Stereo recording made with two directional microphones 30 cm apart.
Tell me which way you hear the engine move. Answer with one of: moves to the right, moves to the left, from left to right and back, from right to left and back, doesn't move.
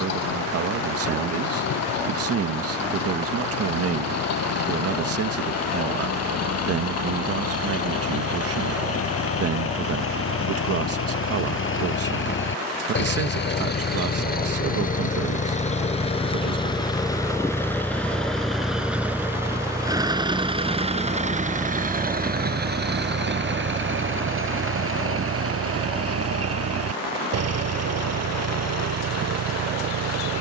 moves to the right.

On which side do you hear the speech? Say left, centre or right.
right.